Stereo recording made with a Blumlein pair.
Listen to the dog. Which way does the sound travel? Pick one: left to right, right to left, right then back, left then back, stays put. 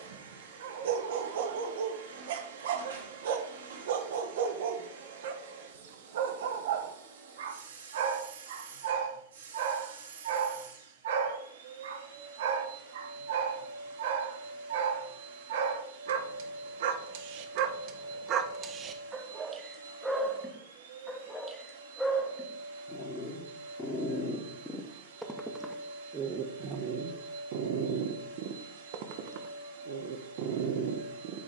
left then back.